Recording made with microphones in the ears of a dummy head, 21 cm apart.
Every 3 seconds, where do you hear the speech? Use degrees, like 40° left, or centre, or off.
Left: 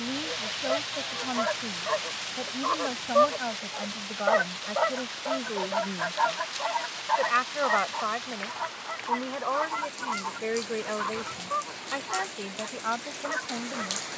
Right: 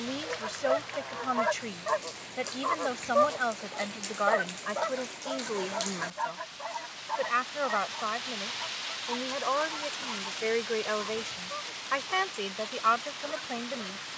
70° right, 50° right, centre, 30° right, 60° right.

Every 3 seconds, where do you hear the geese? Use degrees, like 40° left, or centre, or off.
20° right, 20° left, 40° left, 50° left, 50° left.